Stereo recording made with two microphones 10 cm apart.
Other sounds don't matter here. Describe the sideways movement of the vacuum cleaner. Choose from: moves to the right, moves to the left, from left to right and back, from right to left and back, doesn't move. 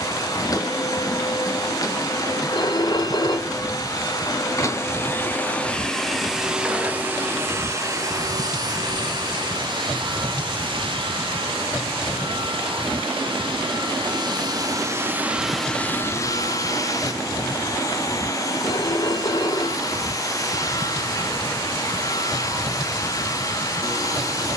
from left to right and back.